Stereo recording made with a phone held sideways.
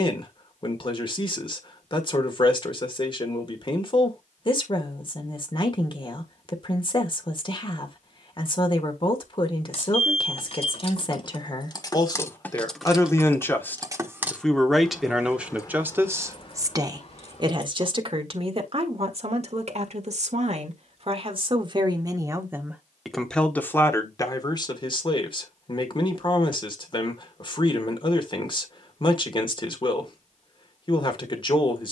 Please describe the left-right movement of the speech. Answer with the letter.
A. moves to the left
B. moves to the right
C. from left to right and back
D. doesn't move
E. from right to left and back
C.